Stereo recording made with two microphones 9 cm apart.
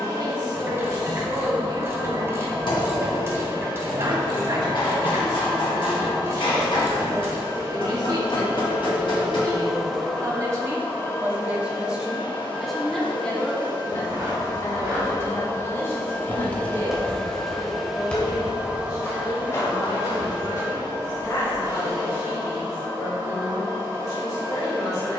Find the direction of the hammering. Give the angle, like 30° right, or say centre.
60° left.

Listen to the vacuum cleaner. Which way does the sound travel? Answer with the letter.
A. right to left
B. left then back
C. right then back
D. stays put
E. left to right
B.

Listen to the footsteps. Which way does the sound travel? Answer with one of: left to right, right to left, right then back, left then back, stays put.
right to left.